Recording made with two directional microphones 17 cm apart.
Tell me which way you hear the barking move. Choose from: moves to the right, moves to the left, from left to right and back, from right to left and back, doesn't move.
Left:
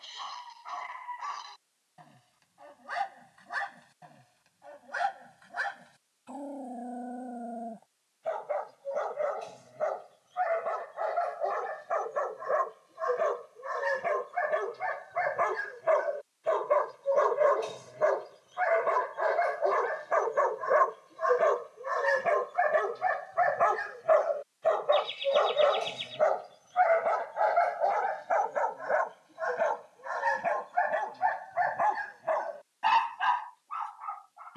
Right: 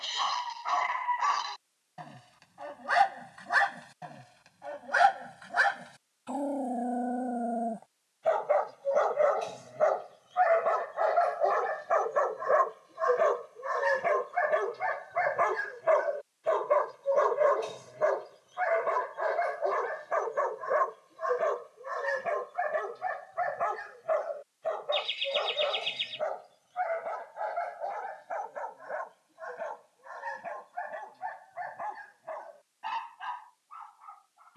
moves to the left.